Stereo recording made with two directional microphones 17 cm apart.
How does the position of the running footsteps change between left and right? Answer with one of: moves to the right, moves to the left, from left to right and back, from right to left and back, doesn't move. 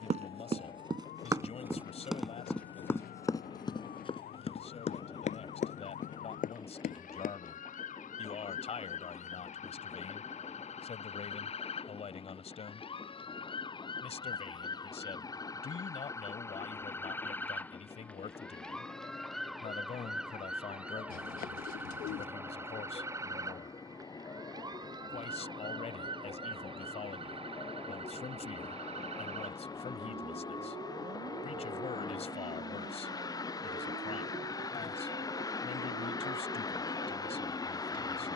moves to the left.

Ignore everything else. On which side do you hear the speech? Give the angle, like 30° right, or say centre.
40° left.